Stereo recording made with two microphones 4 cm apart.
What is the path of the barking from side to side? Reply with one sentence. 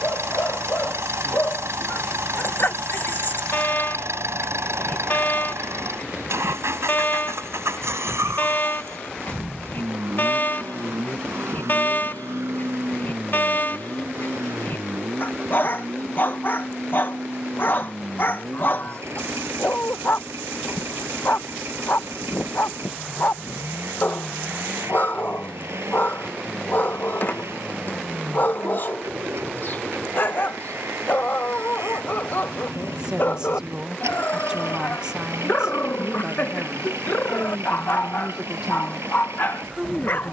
You can hear the barking stay put.